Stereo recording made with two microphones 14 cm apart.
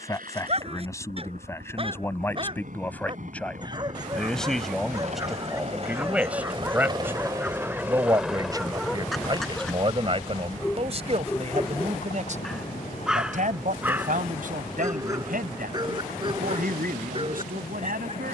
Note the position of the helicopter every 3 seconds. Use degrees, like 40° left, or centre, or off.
70° right, 60° right, 20° right, 30° left, 50° left, 70° left.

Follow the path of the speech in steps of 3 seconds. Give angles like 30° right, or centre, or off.
20° left, centre, 20° right, 40° right, 60° right, 70° right.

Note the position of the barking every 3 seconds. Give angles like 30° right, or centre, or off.
40° right, 20° right, 10° right, 10° left, 10° right, 30° right.